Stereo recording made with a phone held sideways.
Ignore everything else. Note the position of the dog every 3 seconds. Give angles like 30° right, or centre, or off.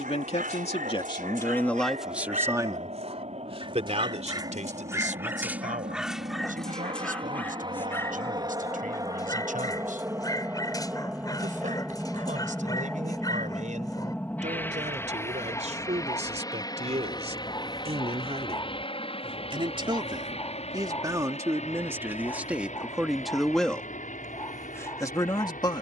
60° right, 20° right, 10° left, 20° left, 20° left, 20° left, 20° left, 20° left, 20° left.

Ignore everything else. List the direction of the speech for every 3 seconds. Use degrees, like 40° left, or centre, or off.
10° left, 50° right, 60° right, 60° right, 50° right, 50° right, 30° right, 10° right, 20° left.